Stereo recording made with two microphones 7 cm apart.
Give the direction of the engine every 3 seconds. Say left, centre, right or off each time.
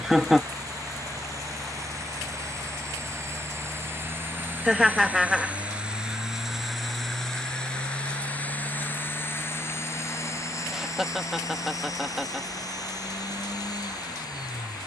right, right, centre, left, left.